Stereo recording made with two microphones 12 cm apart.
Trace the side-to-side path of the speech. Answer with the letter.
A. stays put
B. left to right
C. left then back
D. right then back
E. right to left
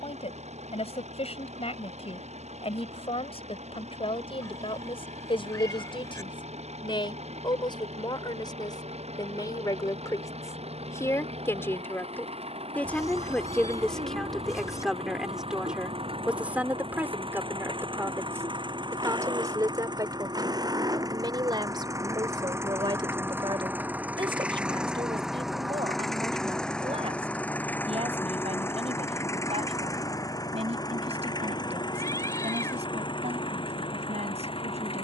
B.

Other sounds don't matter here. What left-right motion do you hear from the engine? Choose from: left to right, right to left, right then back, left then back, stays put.
right to left.